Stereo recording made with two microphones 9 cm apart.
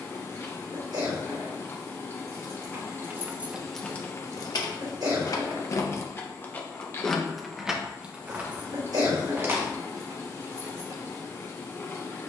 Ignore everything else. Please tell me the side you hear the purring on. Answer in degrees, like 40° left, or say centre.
30° left.